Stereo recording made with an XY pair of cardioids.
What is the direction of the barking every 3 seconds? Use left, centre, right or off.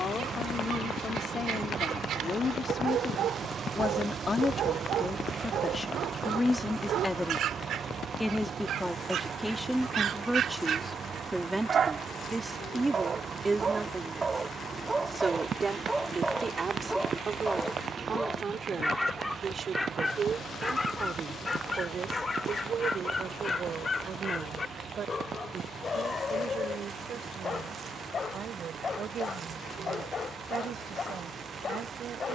right, right, right, right, right, centre, centre, left, left, left, left.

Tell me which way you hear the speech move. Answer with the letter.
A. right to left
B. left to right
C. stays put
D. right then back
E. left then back
B.